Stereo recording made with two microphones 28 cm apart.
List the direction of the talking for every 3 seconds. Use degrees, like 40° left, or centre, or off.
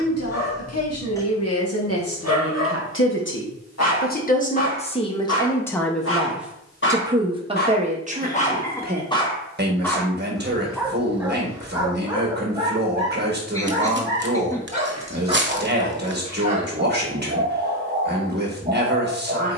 60° left, 20° left, 20° right, 40° right, 40° right, 40° right, 40° right.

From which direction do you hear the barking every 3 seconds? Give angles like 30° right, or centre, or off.
60° left, 60° left, 40° left, centre, 20° right, 20° right, 20° right.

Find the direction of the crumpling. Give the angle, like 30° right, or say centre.
40° right.